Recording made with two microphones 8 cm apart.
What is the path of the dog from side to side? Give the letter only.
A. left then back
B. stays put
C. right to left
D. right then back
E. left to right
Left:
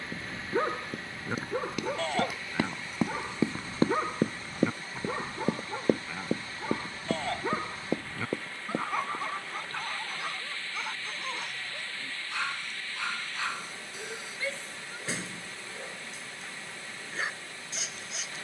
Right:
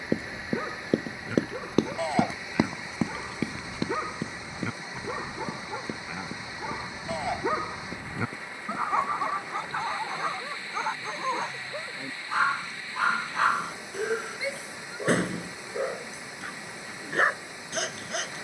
E.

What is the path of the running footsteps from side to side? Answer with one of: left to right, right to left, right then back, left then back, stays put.
right to left.